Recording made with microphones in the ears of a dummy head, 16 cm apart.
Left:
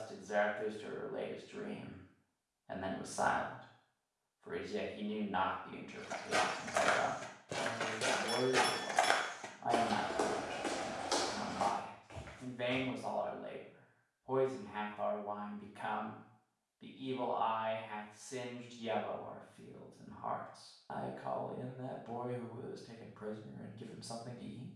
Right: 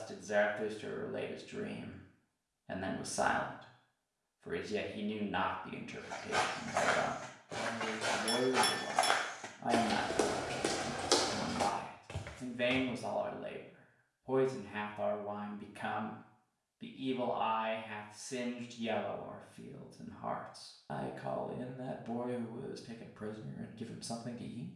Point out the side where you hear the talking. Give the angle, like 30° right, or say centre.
30° right.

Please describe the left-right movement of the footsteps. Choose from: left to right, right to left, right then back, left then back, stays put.
left to right.